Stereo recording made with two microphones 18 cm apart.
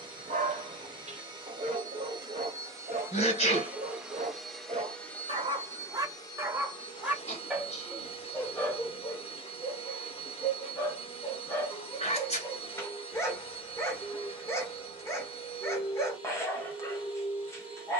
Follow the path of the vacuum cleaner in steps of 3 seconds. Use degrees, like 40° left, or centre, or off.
20° right, centre, 30° left, 30° left, 30° left, 30° left.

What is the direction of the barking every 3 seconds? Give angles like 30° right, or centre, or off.
40° right, 40° right, centre, 10° left, 20° left, 20° left.